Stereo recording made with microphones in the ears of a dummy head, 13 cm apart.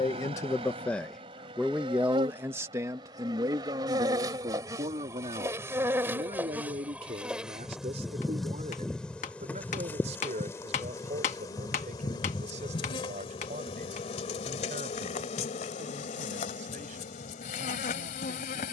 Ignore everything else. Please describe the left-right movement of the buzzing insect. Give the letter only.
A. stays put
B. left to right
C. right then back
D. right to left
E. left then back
D.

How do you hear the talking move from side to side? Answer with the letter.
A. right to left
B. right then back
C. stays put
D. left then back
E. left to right
E.